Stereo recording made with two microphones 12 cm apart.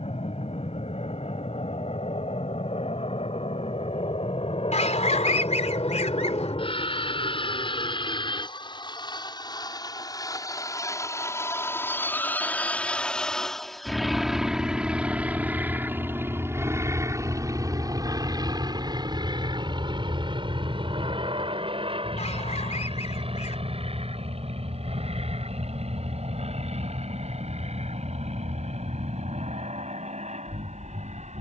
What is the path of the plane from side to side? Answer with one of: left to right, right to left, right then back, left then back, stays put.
left to right.